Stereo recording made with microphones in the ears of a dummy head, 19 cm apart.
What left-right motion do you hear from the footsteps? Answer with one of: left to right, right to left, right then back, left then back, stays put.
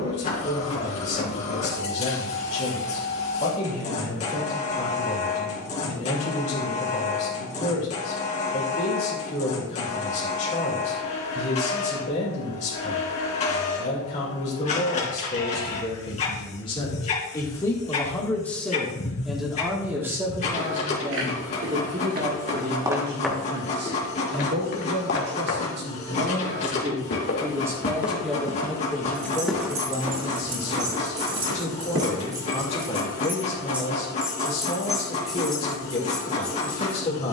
left then back.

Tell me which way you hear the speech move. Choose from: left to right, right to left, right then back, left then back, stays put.
right then back.